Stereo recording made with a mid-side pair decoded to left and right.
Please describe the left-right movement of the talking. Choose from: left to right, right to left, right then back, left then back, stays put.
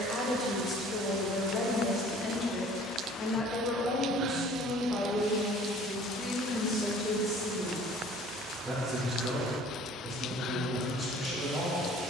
left to right.